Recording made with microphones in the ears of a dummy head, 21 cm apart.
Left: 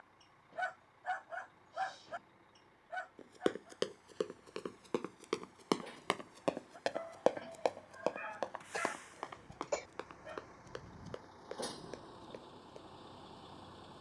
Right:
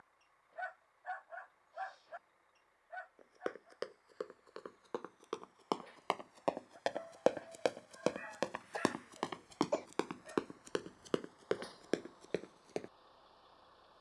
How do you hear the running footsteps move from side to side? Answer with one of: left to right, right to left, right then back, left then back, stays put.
left to right.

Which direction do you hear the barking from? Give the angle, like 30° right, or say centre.
60° left.